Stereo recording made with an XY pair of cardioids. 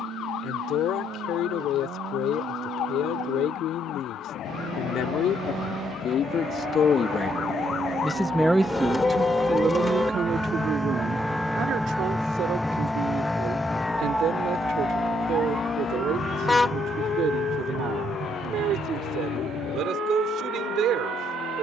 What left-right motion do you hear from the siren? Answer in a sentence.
You can hear the siren travel towards the right.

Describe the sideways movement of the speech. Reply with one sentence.
In this clip you hear the speech travel towards the right.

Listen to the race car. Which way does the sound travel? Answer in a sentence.
In this clip you hear the race car move from right to left.